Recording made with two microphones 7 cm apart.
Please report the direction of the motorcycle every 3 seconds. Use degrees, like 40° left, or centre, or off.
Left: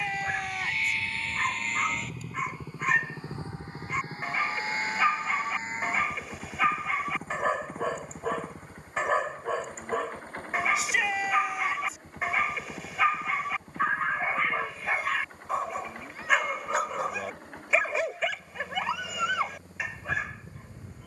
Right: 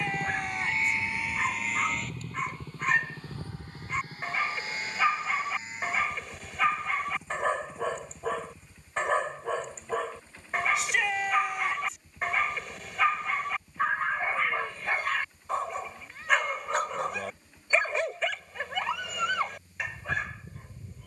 10° right, 30° left, 50° left, 50° left, 60° left, 60° left, 60° left.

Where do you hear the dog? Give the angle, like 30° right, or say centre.
centre.